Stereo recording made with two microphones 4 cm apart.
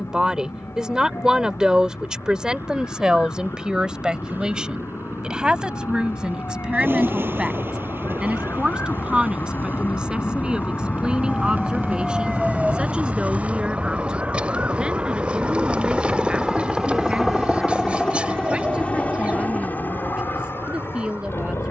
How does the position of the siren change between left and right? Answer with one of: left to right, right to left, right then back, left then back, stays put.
left to right.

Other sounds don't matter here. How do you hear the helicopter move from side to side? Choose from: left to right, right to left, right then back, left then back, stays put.
right to left.